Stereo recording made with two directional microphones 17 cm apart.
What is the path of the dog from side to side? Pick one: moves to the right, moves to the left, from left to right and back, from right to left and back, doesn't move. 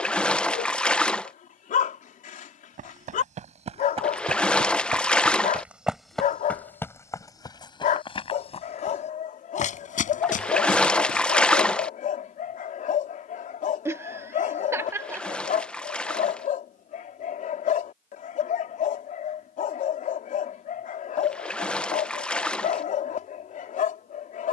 doesn't move.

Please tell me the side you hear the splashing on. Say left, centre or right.
centre.